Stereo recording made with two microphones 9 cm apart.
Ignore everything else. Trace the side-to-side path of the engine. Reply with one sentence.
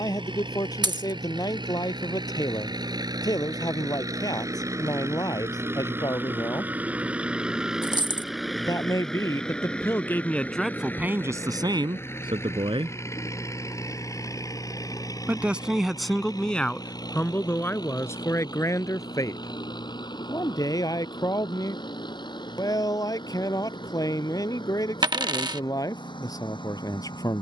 In this clip you hear the engine move from right to left.